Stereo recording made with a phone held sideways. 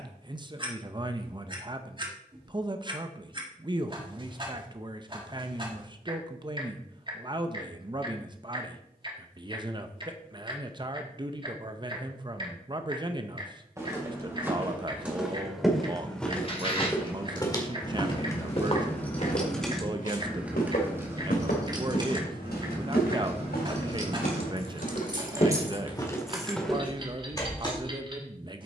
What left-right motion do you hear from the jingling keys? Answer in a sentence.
You can hear the jingling keys go right and come back.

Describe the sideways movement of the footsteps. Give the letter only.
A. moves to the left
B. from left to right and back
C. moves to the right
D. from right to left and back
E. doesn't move
D.